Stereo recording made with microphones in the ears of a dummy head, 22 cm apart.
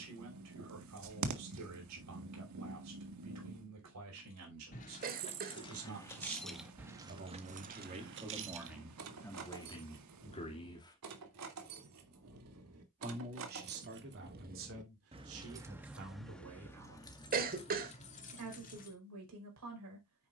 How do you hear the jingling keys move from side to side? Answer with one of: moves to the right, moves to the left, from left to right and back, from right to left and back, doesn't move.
from left to right and back.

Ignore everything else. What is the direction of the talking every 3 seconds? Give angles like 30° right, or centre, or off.
80° right, 70° right, 30° right, 20° left, 50° right, 70° right, 80° right.